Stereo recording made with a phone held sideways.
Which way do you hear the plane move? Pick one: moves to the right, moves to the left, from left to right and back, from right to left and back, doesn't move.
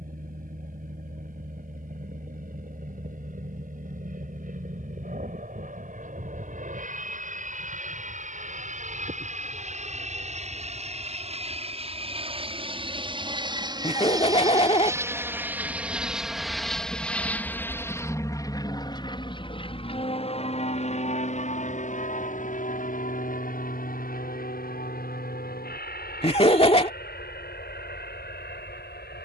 moves to the left.